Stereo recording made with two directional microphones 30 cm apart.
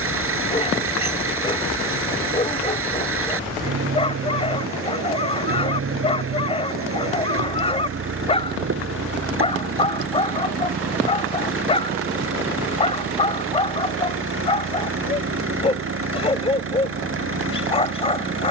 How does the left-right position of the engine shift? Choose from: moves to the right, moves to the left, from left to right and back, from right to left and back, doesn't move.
doesn't move.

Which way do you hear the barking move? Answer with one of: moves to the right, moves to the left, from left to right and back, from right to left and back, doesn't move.
doesn't move.